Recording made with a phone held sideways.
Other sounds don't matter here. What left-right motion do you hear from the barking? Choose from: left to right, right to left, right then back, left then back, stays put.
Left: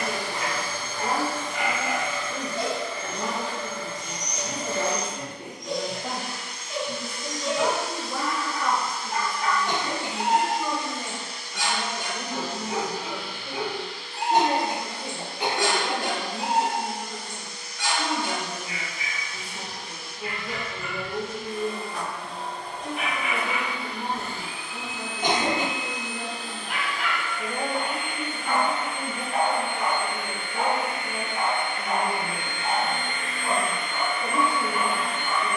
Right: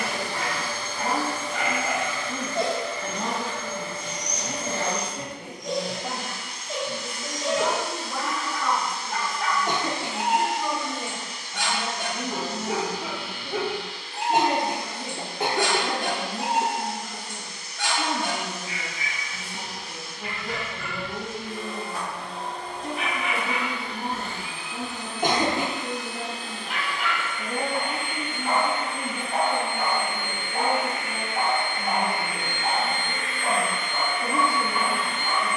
left then back.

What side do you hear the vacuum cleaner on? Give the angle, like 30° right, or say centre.
80° right.